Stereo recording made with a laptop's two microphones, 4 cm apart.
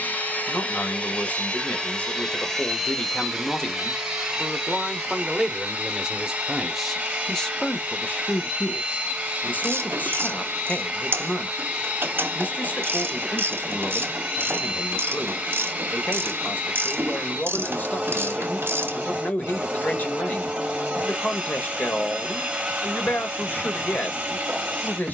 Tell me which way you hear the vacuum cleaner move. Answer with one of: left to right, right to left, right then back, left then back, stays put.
left to right.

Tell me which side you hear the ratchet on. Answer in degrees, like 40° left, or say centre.
60° right.